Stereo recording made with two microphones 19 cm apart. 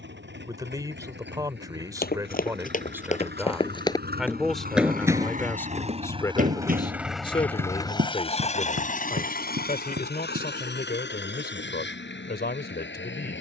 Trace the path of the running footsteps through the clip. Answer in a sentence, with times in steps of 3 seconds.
In this clip you hear the running footsteps on the left from 0 s, in the centre from 3 s, on the right from 6 s and not at all from 12 s.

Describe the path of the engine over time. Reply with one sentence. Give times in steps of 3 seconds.
You can hear the engine on the right from 0 s, in the centre from 6 s and on the left from 9 s.